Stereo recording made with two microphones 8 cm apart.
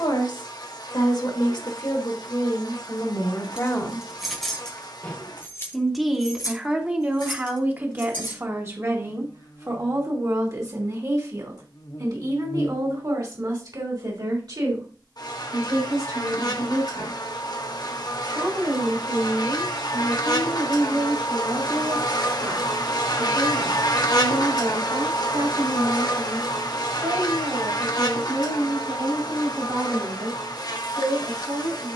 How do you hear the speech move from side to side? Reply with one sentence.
You can hear the speech go from the left side to the right.